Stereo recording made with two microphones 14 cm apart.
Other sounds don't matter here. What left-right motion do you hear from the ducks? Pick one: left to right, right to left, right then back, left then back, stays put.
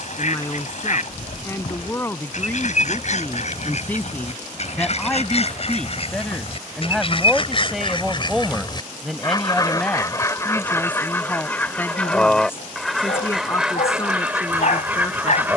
left to right.